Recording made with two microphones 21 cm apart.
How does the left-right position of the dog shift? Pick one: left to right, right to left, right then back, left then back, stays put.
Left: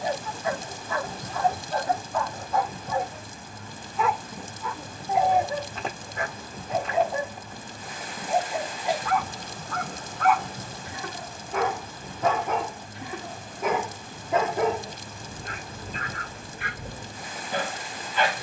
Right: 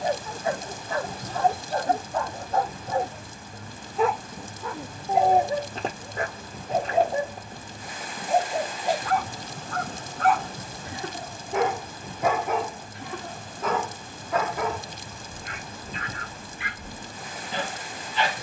right to left.